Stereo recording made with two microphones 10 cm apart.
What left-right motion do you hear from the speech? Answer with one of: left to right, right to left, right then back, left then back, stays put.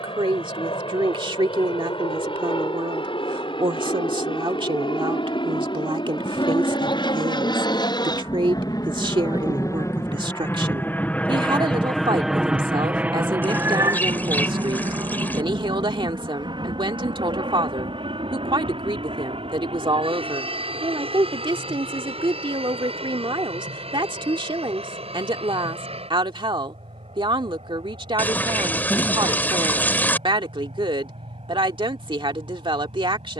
stays put.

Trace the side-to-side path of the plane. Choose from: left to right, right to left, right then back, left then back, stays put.
left to right.